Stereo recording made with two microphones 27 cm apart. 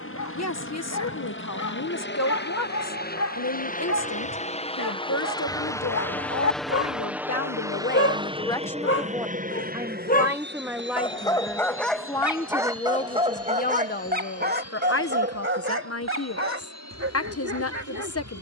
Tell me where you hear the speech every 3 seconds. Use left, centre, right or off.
left, left, left, centre, left, left.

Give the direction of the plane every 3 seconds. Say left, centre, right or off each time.
left, left, centre, right, right, right.